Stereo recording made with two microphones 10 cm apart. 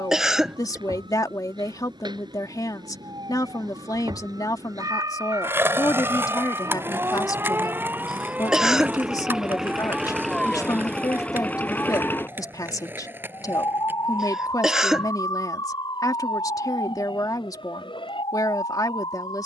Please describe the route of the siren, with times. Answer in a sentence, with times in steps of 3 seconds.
You can hear the siren on the right from 0 s, in the centre from 9 s and on the left from 12 s.